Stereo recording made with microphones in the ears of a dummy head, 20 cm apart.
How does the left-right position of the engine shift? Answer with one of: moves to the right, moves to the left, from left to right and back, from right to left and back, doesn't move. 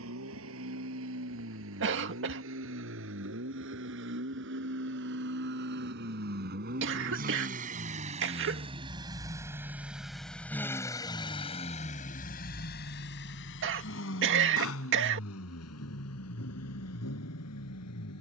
moves to the left.